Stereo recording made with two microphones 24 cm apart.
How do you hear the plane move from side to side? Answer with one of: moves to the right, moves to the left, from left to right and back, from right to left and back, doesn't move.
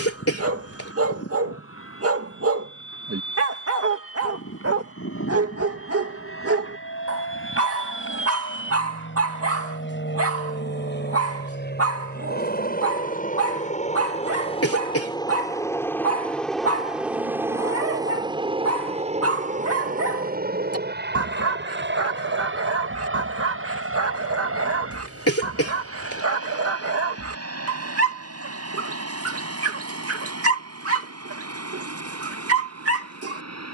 moves to the right.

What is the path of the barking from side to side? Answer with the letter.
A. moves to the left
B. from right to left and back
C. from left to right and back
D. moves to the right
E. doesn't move
E.